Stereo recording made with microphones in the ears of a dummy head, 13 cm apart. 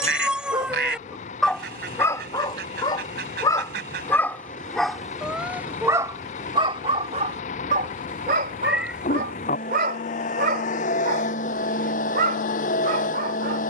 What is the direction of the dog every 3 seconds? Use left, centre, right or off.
centre, centre, right, right, right.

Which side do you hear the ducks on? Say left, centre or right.
right.